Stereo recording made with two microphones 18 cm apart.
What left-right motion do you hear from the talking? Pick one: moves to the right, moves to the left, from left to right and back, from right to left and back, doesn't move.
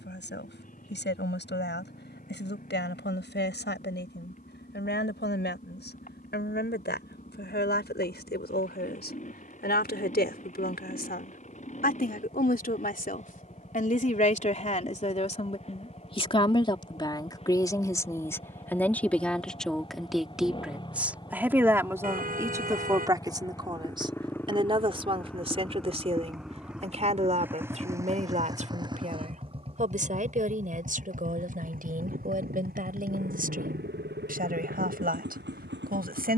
moves to the right.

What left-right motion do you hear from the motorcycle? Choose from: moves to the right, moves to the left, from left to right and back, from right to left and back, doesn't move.
moves to the right.